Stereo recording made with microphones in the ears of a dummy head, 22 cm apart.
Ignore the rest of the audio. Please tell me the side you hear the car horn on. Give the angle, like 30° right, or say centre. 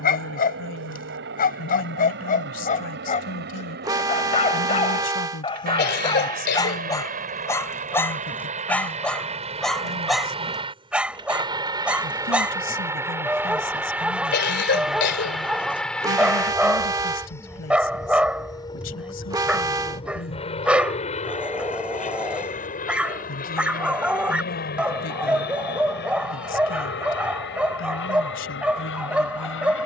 20° right.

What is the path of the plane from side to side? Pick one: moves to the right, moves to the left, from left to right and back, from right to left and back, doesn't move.
moves to the left.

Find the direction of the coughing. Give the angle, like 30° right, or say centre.
50° left.